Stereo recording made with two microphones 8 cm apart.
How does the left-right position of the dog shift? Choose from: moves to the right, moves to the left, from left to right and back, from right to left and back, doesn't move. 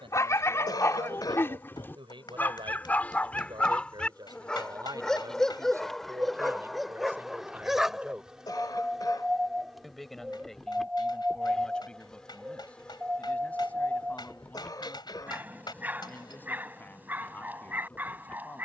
moves to the right.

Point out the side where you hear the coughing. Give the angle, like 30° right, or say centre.
50° left.